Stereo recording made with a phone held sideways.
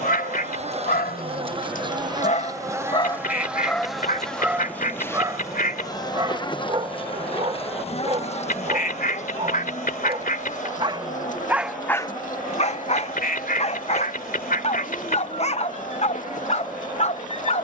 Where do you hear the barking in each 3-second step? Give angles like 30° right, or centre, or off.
60° left, centre, 40° right, 30° right, 40° left, 50° left.